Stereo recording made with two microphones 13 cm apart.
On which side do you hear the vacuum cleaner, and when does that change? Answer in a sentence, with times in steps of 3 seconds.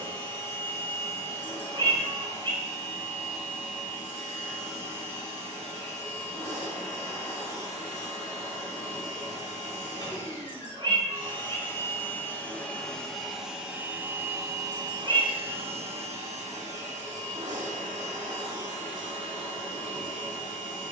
You can hear the vacuum cleaner on the left from 0 s, in the centre from 12 s and on the right from 15 s.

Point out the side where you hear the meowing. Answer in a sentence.
You can hear the meowing on the right.